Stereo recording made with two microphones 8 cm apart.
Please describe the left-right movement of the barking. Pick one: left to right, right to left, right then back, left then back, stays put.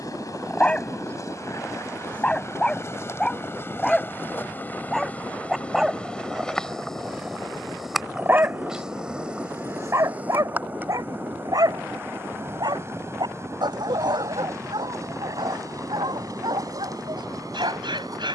left to right.